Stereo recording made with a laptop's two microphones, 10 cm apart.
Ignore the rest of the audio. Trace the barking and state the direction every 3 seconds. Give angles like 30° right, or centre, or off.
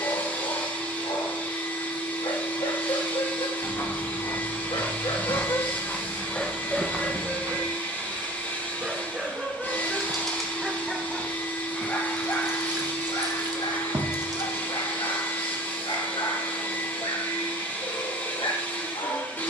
60° left, 60° left, centre, centre, 50° left, 60° left, 60° left.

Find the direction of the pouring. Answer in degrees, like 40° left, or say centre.
40° right.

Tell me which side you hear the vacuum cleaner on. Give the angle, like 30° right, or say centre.
20° left.